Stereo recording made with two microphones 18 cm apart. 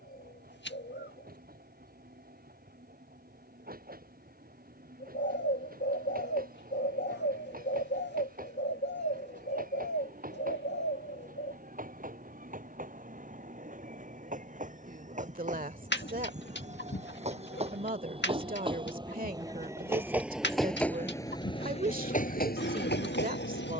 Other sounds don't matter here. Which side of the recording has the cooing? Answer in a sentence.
You can hear the cooing on the left.